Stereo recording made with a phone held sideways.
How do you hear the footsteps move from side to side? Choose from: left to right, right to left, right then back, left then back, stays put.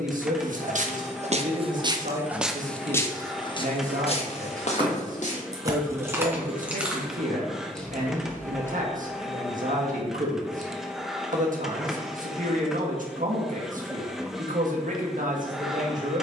right to left.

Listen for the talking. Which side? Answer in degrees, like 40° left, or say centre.
70° right.